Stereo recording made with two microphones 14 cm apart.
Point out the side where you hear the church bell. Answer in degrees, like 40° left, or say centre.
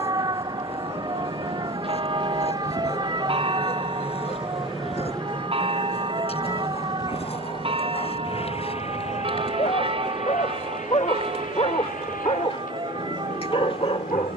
40° right.